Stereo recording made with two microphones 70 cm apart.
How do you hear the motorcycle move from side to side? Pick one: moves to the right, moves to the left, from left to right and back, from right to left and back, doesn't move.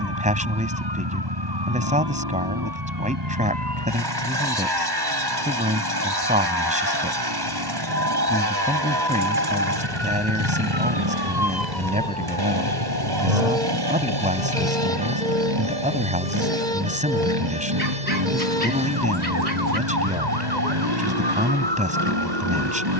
doesn't move.